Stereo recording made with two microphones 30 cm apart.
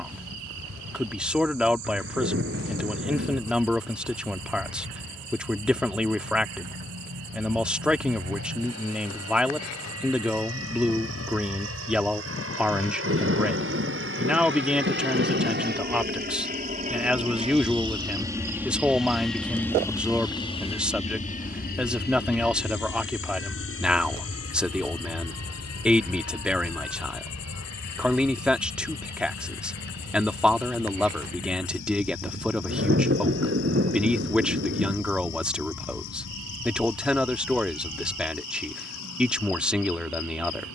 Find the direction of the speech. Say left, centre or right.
centre.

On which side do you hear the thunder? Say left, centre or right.
right.